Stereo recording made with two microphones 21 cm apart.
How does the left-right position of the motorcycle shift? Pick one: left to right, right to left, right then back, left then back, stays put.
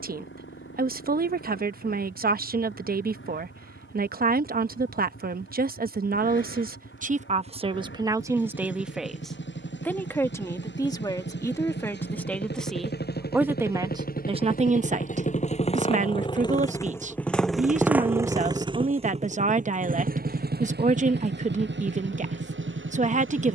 left to right.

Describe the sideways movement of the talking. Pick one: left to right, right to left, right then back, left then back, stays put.
left then back.